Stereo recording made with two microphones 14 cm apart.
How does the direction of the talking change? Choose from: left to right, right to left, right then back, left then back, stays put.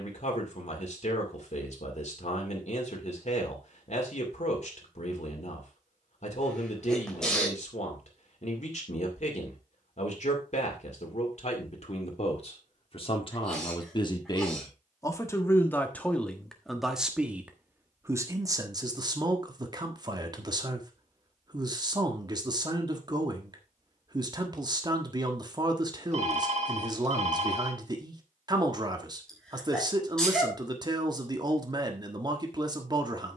left to right.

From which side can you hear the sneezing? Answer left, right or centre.
centre.